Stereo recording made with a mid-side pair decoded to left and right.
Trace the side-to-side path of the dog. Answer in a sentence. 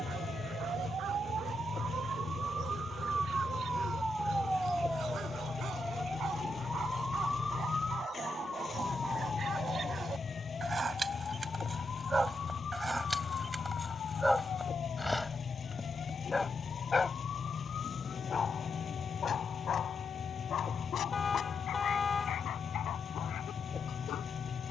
In this clip you hear the dog move to the left.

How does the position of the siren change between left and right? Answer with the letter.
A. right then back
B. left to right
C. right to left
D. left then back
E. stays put
C.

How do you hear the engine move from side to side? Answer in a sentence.
You can hear the engine stay in one place.